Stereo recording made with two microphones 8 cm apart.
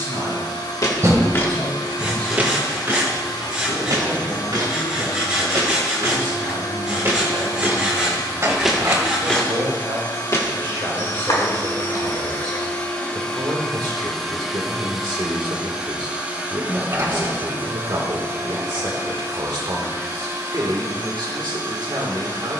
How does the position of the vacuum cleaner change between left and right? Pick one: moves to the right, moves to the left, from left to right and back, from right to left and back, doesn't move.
moves to the right.